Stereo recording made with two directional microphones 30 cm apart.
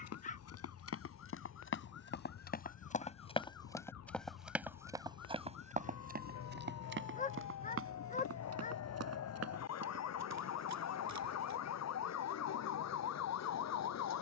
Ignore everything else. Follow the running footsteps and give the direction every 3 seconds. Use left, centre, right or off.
left, centre, right, right, off.